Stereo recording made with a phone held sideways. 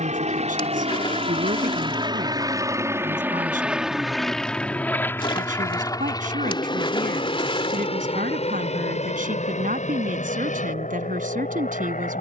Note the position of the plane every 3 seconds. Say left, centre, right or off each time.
right, centre, left, left.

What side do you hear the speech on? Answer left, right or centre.
right.